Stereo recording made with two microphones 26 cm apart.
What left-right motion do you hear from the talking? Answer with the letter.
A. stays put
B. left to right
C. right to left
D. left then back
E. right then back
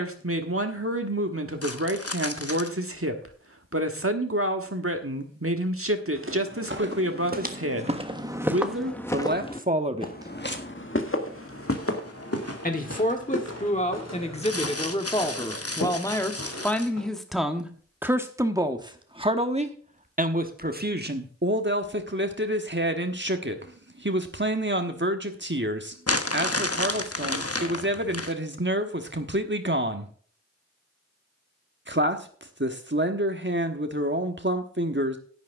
D.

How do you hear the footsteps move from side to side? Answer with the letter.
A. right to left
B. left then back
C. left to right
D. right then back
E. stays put
A.